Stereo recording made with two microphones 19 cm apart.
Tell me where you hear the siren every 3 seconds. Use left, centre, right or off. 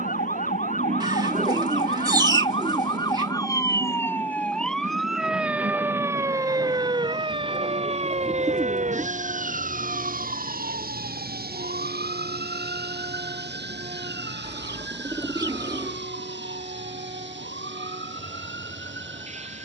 left, centre, right, right, right, right, right.